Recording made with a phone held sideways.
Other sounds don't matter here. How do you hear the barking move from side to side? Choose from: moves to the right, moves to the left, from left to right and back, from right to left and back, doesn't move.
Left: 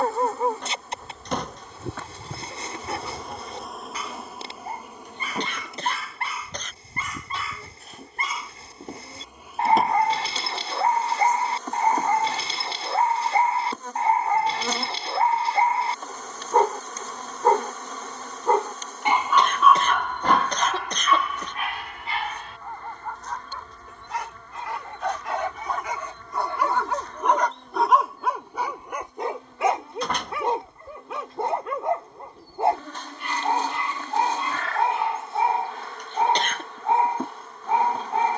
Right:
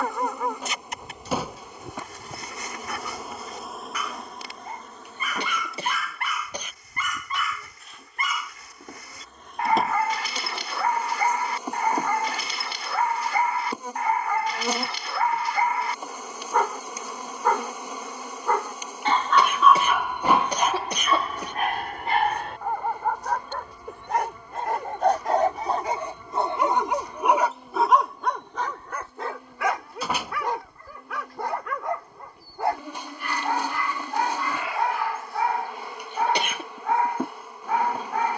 from left to right and back.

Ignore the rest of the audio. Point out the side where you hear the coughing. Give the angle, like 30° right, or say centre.
10° right.